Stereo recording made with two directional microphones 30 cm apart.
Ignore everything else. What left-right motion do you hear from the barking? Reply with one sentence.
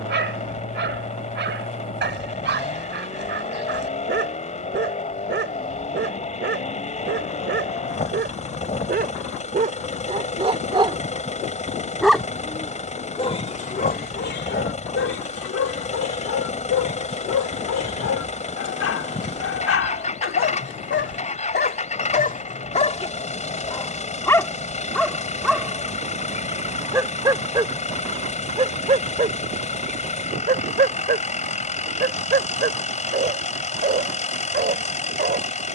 In this clip you hear the barking move from right to left and back again.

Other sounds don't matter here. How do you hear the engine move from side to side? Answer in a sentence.
In this clip you hear the engine stay in one place.